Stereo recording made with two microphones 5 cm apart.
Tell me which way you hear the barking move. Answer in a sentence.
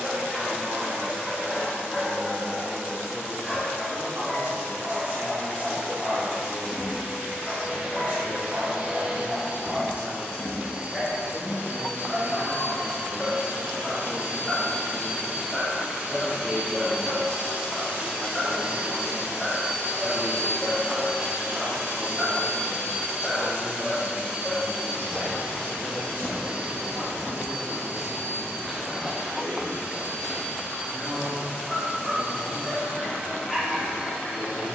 In this clip you hear the barking stay put.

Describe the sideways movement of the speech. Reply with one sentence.
You can hear the speech travel towards the left.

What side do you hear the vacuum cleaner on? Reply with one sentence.
You can hear the vacuum cleaner on the right.